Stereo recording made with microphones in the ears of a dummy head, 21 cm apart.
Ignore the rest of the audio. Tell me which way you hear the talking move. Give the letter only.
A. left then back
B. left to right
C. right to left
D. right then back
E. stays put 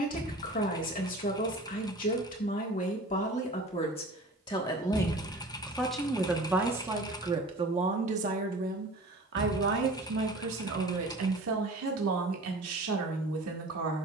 B.